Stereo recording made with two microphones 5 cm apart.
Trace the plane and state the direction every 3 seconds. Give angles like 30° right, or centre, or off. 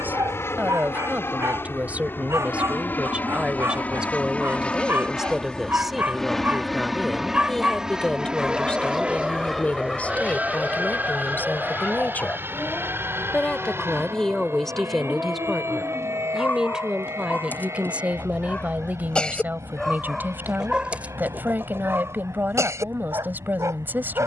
50° left, 20° left, 10° right, 30° right, 40° right, 50° right, 60° right, 60° right.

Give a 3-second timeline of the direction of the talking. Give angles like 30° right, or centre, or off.
30° right, 10° right, 10° left, 30° left, 20° left, 10° right, 30° right, 40° right.